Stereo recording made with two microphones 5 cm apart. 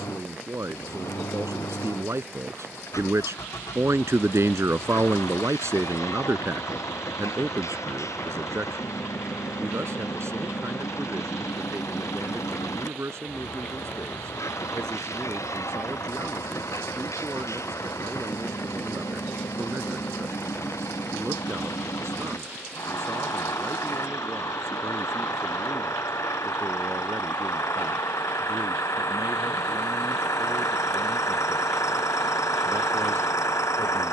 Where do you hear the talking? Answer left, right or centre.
right.